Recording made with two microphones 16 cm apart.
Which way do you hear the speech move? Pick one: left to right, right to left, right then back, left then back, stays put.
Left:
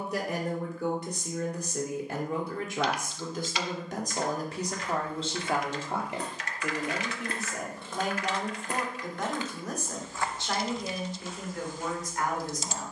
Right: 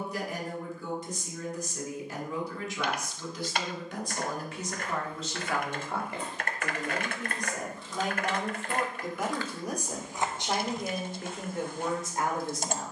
left to right.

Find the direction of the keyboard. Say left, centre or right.
right.